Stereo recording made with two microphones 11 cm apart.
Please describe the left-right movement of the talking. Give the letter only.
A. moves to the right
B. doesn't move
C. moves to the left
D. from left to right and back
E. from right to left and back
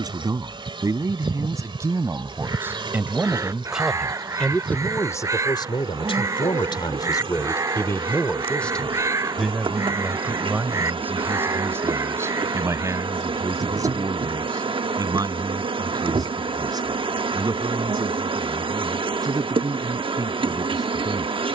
E.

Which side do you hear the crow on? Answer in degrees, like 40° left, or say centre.
30° right.